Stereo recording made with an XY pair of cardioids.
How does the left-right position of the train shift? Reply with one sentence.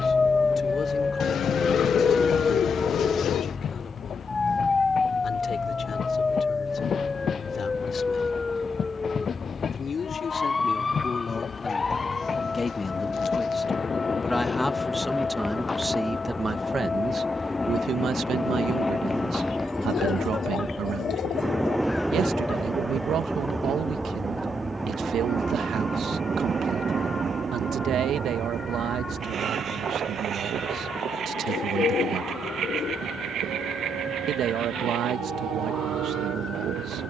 In this clip you hear the train move from left to right.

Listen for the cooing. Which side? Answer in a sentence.
In this clip you hear the cooing on the left.